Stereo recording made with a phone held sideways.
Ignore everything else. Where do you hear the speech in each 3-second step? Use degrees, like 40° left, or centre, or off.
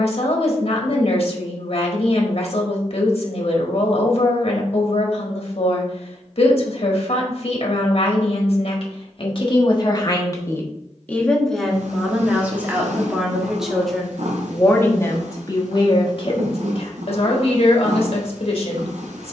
50° left, 50° left, 50° left, 20° left, centre, 40° left, 50° left.